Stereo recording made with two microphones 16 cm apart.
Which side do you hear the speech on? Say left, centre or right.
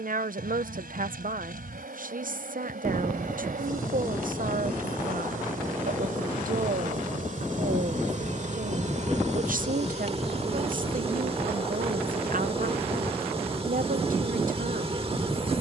right.